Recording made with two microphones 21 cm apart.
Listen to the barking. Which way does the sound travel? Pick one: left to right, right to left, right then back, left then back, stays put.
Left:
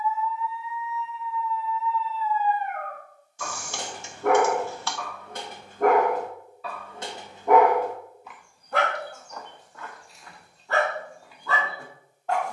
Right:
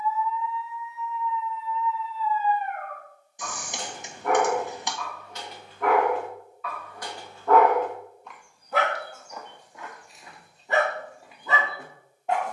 left to right.